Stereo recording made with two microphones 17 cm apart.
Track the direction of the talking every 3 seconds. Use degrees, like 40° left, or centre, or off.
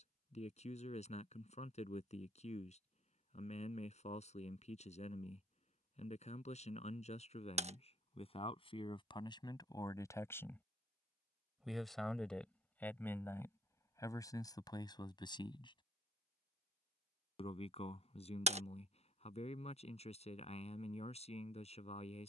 40° left, 40° left, 40° left, 20° left, 20° left, 30° left, 40° left, 40° left.